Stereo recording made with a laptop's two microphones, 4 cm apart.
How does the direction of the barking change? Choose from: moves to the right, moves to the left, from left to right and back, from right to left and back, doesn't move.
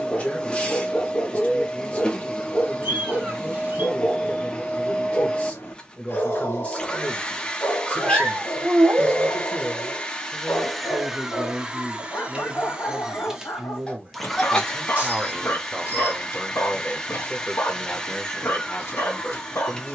doesn't move.